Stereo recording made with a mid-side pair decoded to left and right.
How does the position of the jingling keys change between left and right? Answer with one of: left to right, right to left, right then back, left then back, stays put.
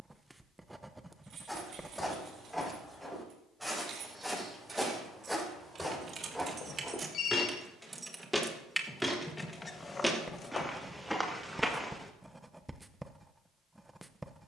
right to left.